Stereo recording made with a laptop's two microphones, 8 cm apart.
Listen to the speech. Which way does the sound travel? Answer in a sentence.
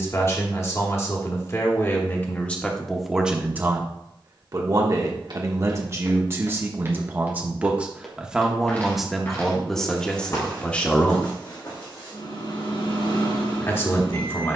In this clip you hear the speech go right and come back.